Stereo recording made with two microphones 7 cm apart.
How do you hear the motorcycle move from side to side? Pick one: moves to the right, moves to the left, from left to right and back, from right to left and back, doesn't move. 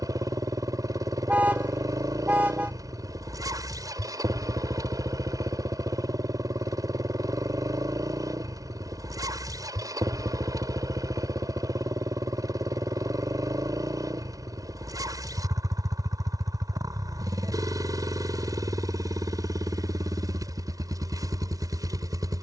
doesn't move.